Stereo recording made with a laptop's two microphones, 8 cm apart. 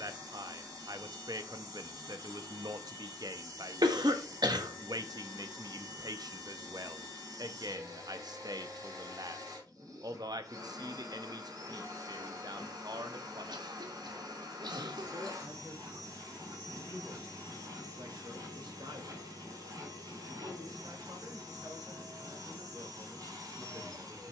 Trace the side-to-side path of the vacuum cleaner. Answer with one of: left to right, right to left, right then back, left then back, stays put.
stays put.